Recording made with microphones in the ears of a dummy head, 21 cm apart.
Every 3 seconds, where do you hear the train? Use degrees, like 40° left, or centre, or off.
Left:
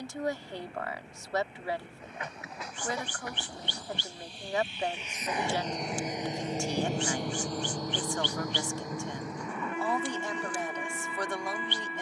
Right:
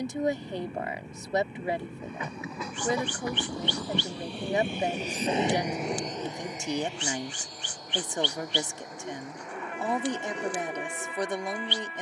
80° right, 40° right, 40° left, 70° left.